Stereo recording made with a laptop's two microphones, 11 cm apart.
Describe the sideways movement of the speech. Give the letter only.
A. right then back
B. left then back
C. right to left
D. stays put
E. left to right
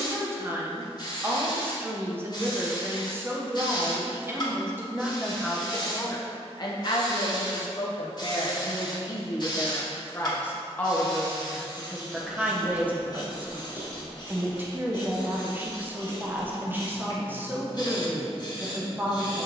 B.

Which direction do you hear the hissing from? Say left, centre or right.
left.